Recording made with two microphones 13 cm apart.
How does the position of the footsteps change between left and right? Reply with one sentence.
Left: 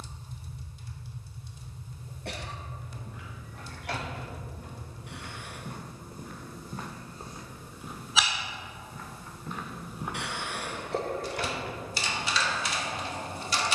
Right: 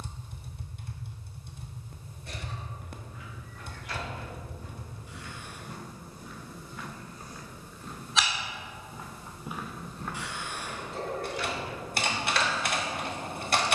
You can hear the footsteps go right and come back.